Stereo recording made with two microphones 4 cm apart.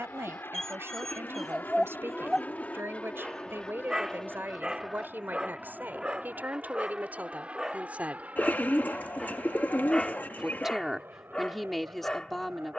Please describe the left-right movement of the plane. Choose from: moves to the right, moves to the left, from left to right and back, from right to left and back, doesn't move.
moves to the right.